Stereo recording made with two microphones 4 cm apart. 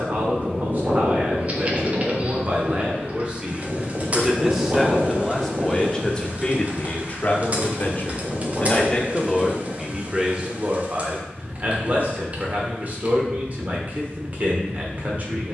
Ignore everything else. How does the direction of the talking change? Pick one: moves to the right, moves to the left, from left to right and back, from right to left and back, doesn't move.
from right to left and back.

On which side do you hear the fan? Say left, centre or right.
right.